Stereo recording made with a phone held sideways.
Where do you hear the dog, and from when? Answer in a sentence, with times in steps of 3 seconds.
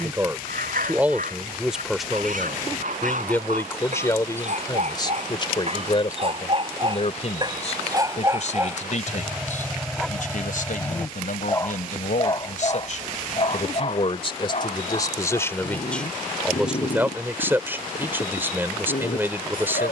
In this clip you hear the dog on the right from 0 s, in the centre from 9 s and on the left from 12 s.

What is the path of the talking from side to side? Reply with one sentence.
You can hear the talking move from right to left and back again.